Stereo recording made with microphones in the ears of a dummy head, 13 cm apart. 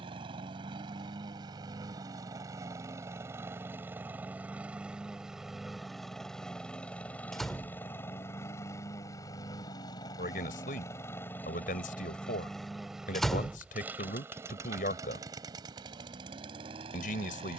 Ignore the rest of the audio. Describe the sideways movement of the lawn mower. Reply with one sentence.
You can hear the lawn mower go left and come back.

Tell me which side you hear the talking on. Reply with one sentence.
You can hear the talking on the left.